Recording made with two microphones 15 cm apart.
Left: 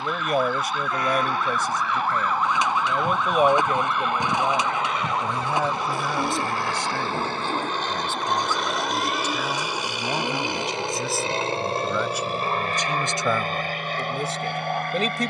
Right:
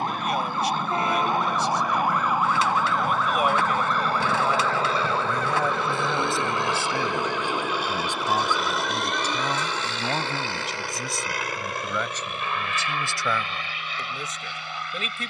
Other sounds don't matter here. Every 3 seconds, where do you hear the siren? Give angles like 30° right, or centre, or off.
20° right, 10° left, 40° left, 50° left, 50° left.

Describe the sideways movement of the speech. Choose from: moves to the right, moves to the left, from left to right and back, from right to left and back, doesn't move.
from left to right and back.